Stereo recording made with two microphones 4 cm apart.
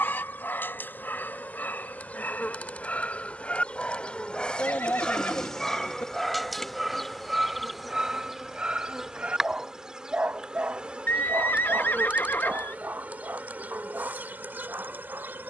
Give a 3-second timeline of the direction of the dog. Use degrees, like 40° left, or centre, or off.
40° left, 20° left, 10° right, 30° right, 50° right.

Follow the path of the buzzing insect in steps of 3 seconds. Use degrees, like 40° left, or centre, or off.
40° left, 20° left, centre, 20° right, 40° right.